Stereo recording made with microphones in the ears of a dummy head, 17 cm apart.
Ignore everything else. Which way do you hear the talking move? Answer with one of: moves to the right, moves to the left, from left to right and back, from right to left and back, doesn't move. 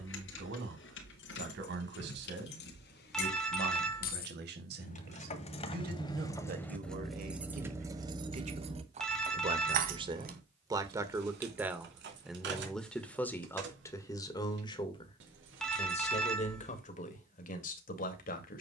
moves to the left.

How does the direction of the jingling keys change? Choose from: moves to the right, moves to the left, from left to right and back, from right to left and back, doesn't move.
moves to the right.